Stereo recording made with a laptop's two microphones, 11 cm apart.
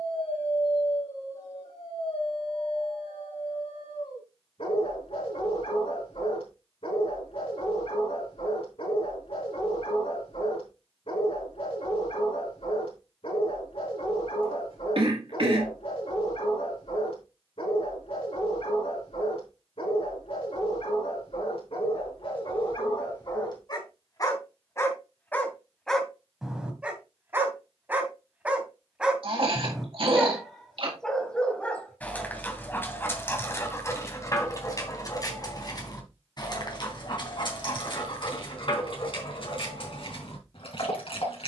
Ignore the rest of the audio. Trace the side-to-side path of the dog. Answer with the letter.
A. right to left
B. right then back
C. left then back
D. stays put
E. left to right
B.